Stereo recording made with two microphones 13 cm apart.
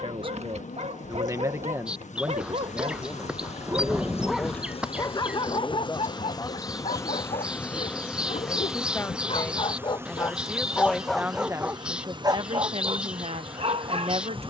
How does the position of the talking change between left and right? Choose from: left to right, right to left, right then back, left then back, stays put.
left then back.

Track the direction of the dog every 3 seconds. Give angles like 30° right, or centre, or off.
50° right, 10° left, 60° left, 20° left, 40° right.